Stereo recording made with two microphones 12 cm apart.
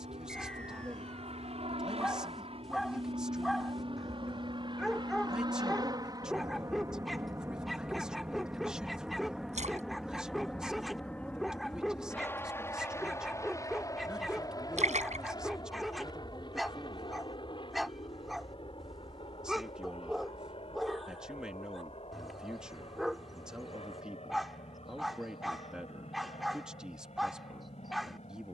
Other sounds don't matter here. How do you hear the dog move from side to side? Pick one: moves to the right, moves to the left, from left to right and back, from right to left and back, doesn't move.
doesn't move.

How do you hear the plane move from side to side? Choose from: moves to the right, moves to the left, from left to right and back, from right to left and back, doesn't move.
moves to the left.